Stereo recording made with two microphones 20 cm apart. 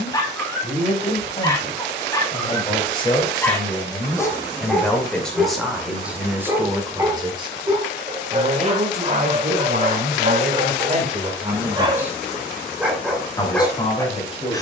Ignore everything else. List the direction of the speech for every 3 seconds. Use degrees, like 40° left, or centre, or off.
30° left, 10° left, 20° right, 40° right, 20° left.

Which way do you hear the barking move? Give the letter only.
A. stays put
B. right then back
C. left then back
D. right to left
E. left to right
B.